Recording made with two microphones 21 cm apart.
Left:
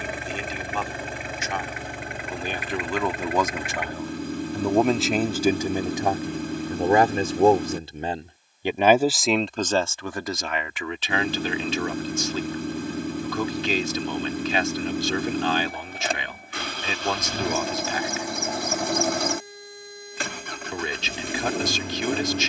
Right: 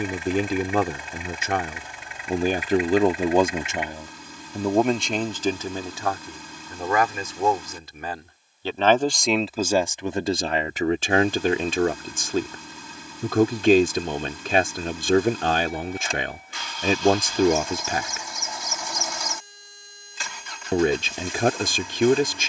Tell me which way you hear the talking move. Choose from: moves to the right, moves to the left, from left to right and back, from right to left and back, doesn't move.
from right to left and back.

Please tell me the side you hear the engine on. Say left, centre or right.
left.